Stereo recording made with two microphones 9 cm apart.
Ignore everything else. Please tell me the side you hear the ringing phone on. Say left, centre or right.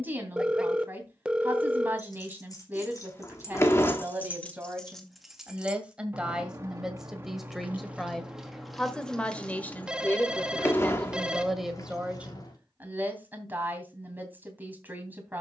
centre.